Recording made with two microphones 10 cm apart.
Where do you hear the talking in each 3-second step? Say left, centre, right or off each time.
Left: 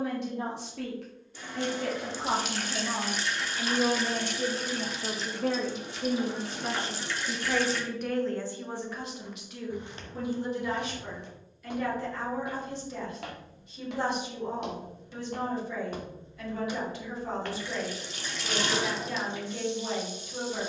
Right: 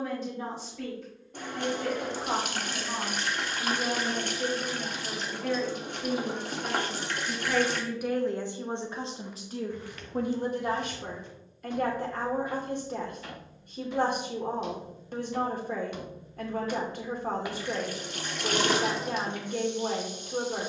left, left, centre, right, right, right, right.